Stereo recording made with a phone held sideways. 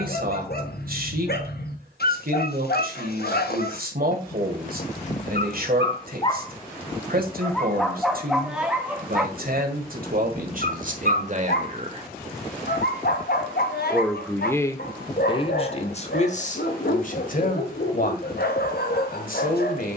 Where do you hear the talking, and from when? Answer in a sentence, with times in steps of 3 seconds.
You can hear the talking on the right from 0 s, in the centre from 12 s and on the left from 15 s.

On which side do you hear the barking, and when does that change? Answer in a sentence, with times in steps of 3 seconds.
In this clip you hear the barking on the left from 0 s, in the centre from 6 s and on the left from 9 s.